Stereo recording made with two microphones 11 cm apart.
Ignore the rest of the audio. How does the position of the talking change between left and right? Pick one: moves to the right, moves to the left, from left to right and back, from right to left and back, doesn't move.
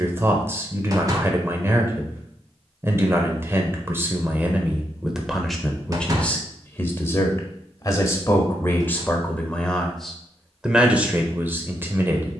from right to left and back.